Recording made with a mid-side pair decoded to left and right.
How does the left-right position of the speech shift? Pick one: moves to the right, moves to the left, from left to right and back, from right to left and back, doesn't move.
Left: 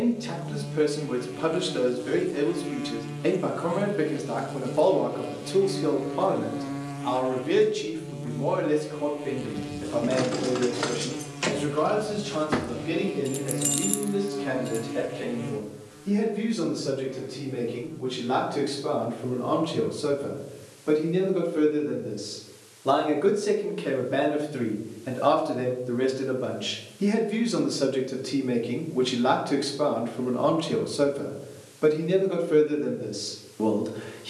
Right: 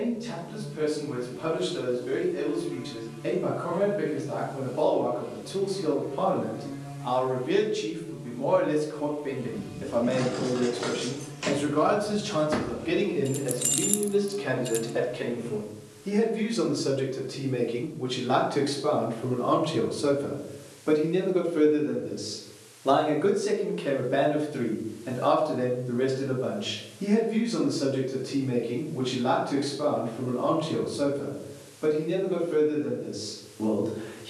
from left to right and back.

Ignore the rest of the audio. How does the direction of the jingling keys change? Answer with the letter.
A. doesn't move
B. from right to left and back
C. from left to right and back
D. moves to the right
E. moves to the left
D.